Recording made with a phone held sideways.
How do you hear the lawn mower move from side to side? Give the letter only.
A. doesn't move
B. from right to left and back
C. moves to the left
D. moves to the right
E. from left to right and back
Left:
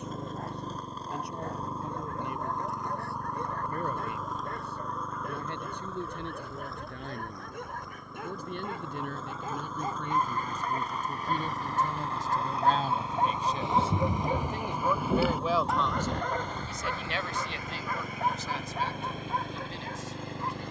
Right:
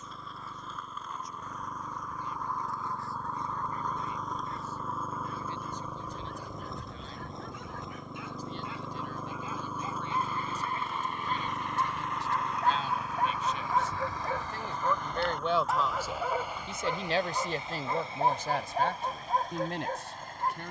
E.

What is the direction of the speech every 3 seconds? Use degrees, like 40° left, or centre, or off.
70° left, 70° left, 60° left, 50° left, 40° left, 20° right, 60° right.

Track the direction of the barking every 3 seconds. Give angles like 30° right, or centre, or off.
60° left, 60° left, 50° left, 40° left, 20° left, 10° right, 40° right.